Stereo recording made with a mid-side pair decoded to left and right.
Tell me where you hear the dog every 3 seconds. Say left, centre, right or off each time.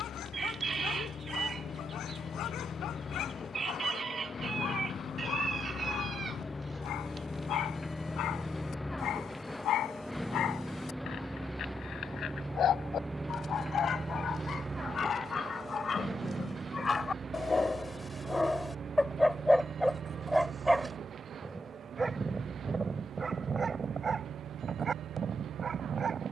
left, left, left, left, left, left, centre, right, right.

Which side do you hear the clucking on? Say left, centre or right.
right.